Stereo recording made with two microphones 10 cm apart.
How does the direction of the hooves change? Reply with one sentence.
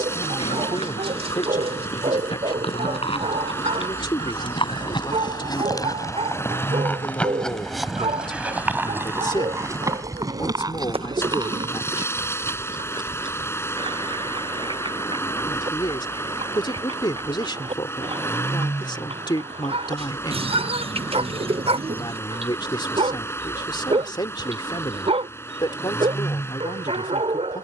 You can hear the hooves move to the right.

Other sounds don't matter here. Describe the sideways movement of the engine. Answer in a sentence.
In this clip you hear the engine stay in one place.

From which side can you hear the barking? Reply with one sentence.
You can hear the barking on the right.